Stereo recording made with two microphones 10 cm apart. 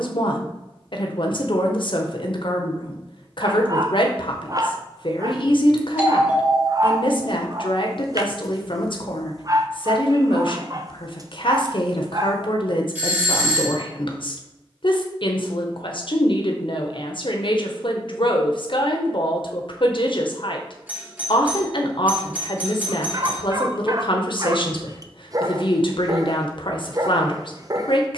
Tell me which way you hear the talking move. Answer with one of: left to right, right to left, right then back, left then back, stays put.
stays put.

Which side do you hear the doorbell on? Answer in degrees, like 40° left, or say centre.
20° right.